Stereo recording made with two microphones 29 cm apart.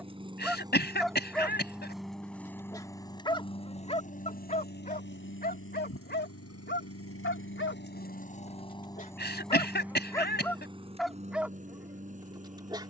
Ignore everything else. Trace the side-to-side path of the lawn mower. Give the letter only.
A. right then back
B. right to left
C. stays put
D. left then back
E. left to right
D.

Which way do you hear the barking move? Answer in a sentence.
In this clip you hear the barking move from right to left and back again.